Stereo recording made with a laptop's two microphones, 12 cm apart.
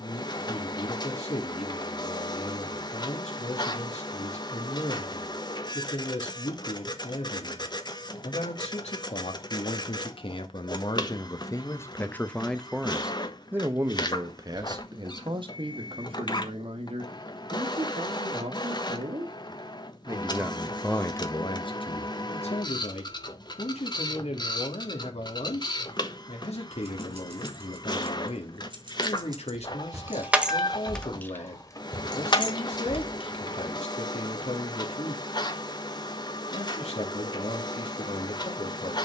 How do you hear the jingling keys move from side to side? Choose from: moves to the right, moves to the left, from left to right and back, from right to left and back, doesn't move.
moves to the left.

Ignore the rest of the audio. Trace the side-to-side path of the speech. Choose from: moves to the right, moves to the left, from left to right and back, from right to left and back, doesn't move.
from left to right and back.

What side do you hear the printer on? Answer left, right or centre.
left.